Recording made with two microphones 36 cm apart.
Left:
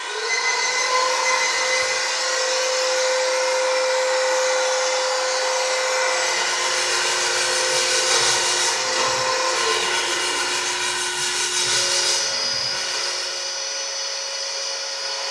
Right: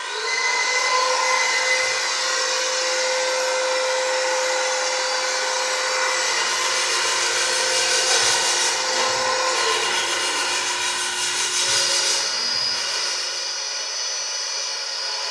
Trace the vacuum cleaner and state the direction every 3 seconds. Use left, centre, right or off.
centre, right, centre, left, left.